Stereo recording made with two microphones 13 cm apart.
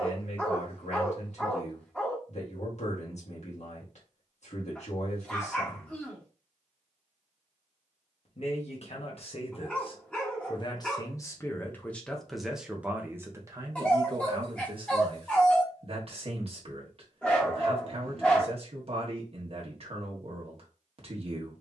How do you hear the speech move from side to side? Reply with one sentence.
In this clip you hear the speech go from the left side to the right.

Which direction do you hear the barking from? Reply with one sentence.
In this clip you hear the barking in the centre.